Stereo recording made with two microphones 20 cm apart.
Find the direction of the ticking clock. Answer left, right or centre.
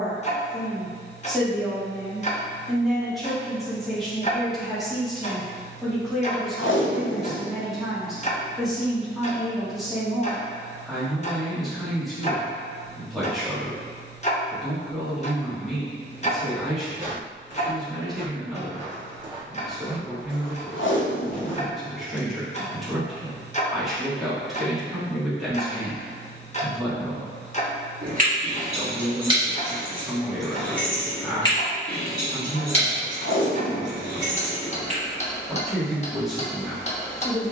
left.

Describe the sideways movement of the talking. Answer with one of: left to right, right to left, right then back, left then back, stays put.
stays put.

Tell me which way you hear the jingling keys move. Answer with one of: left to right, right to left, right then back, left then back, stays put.
left then back.